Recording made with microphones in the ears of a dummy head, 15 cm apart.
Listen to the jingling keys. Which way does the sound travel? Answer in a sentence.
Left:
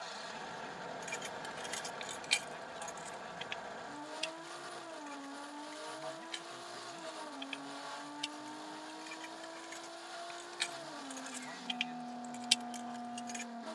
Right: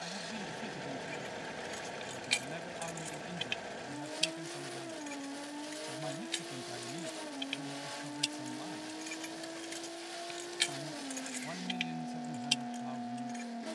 In this clip you hear the jingling keys move from left to right and back again.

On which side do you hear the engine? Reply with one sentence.
You can hear the engine on the right.